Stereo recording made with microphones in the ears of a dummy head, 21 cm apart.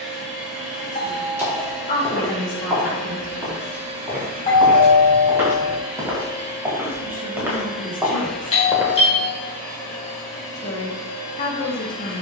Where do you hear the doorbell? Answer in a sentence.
In this clip you hear the doorbell on the left.